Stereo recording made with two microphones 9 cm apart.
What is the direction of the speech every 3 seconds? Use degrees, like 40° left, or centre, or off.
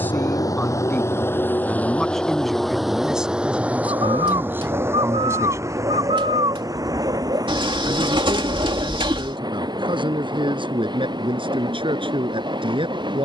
10° left, 20° right, 60° right, 70° right, 70° right.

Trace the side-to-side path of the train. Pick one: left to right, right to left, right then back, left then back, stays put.
left to right.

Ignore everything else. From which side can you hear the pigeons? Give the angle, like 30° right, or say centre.
70° right.